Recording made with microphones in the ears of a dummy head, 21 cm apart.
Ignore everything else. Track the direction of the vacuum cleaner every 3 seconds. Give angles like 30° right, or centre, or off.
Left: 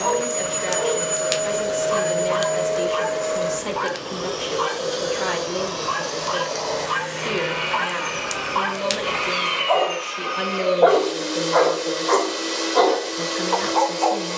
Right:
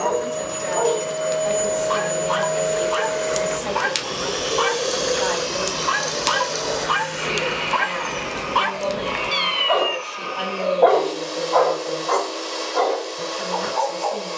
10° left, 40° right, centre, 30° left, 30° left.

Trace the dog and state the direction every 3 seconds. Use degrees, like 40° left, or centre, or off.
70° right, 70° right, 50° right, centre, 50° left.